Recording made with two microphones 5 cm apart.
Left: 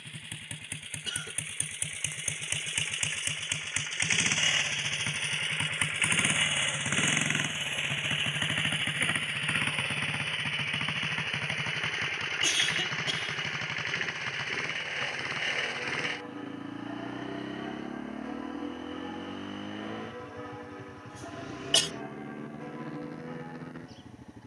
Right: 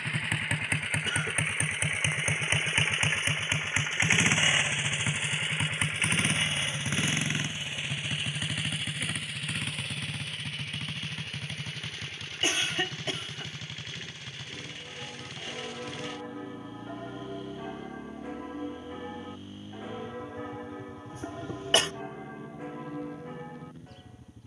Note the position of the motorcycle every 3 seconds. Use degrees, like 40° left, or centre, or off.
60° right, 20° right, 20° left, 40° left, 50° left, 50° left, 60° left, 60° left.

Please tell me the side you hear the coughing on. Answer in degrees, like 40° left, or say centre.
30° right.